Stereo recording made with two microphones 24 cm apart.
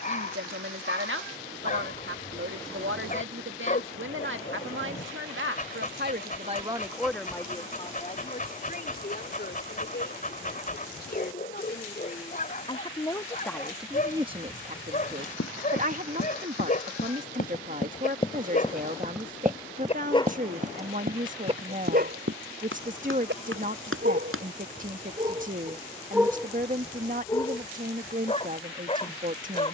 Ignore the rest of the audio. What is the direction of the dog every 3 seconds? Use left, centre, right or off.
left, left, left, left, left, left, left, right, right, left.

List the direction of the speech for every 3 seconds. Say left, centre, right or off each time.
right, right, centre, left, centre, right, right, right, right, right.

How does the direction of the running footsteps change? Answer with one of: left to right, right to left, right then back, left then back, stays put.
left to right.